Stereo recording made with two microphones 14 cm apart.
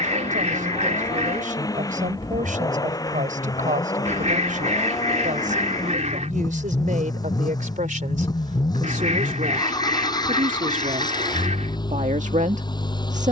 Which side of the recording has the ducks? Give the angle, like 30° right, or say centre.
60° right.